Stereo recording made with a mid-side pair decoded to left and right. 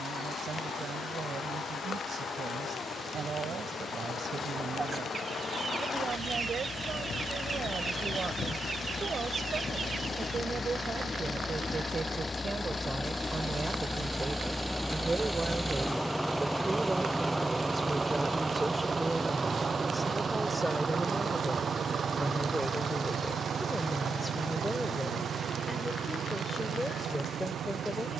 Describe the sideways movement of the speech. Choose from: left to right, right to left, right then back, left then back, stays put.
right to left.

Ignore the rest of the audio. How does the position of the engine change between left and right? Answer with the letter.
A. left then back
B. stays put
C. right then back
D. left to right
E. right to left
D.